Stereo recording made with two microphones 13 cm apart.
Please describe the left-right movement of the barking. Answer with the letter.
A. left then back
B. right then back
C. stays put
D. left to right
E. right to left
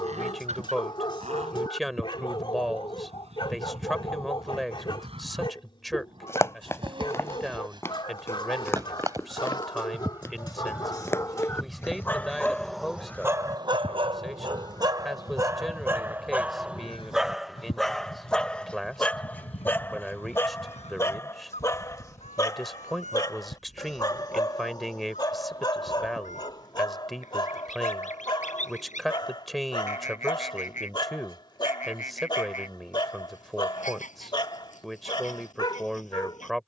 B.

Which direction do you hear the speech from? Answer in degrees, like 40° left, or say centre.
centre.